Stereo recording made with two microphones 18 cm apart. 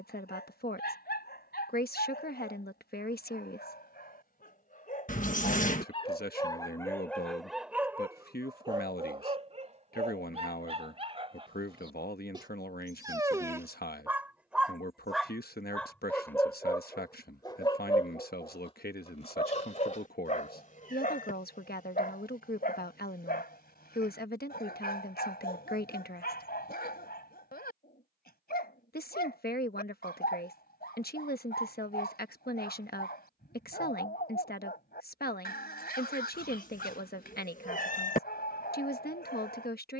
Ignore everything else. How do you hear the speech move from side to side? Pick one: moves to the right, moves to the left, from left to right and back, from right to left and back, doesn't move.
doesn't move.